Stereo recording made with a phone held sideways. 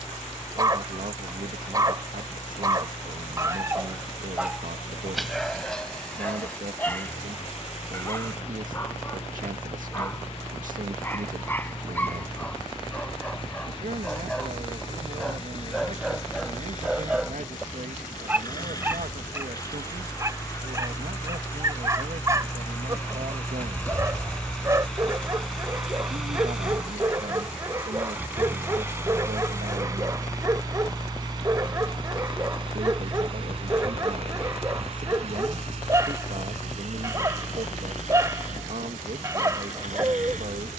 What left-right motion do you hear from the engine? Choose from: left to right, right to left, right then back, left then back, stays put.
left to right.